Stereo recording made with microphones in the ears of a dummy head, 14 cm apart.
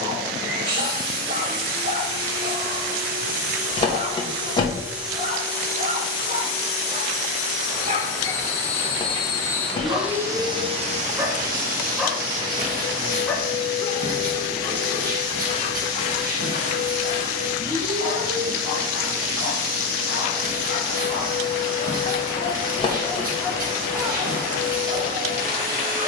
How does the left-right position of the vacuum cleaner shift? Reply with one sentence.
You can hear the vacuum cleaner move from right to left and back again.